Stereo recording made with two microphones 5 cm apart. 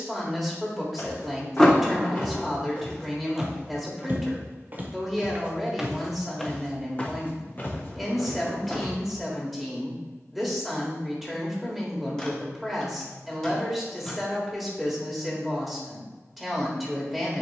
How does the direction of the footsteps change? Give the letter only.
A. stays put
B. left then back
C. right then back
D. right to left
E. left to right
C.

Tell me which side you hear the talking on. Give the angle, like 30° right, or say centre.
centre.